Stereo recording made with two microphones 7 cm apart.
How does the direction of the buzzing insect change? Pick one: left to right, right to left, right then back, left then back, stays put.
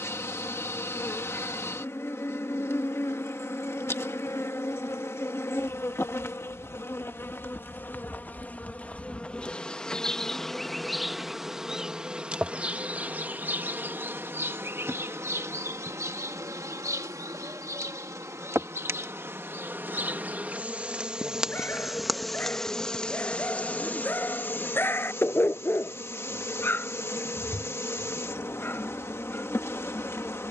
right then back.